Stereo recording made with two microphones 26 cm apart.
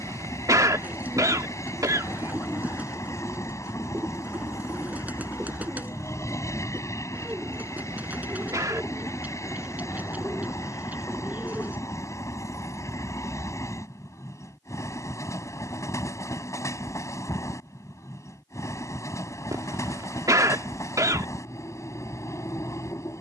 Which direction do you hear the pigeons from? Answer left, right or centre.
centre.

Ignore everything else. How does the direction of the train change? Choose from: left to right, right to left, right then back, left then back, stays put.
stays put.